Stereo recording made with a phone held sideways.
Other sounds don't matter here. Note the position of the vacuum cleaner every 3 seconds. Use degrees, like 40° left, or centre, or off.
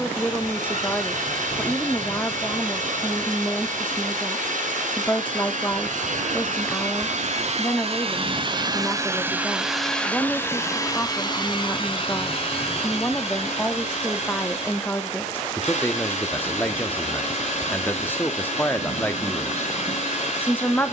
80° right, 80° right, 50° right, 10° left, 50° left, 50° left, 50° left.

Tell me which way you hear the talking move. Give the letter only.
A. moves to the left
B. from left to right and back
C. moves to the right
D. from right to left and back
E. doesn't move
E.